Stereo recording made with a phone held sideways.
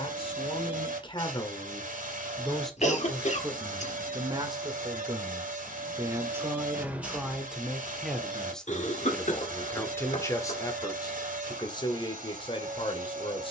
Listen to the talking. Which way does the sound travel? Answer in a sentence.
You can hear the talking move from left to right and back again.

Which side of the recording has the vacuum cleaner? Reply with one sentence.
In this clip you hear the vacuum cleaner on the right.